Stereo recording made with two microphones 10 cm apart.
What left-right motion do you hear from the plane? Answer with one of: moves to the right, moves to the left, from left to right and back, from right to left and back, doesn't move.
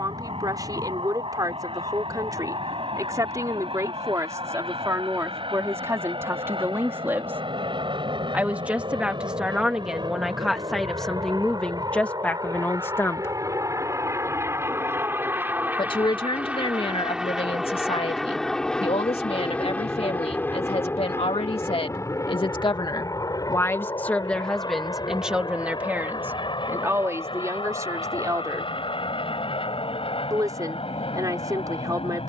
moves to the left.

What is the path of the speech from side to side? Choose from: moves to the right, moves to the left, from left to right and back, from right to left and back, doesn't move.
from right to left and back.